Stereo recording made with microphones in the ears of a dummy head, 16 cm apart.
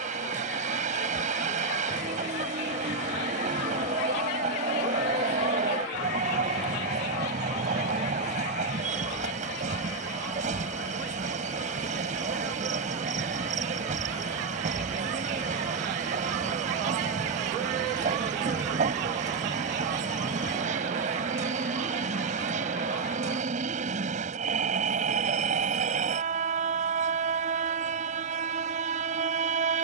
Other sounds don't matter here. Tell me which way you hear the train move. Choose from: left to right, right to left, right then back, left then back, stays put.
stays put.